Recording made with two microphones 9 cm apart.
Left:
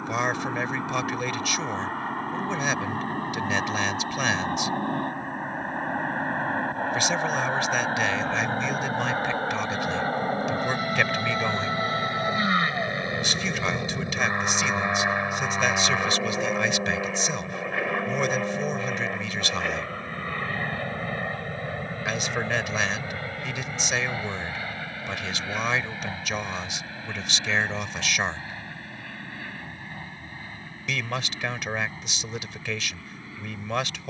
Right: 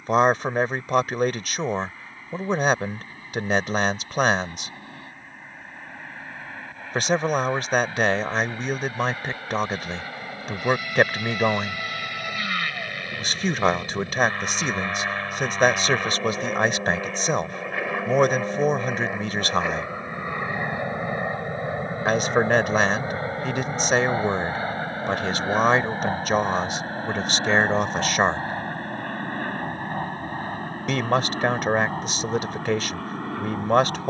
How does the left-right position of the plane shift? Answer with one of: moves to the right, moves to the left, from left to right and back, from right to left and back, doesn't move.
moves to the right.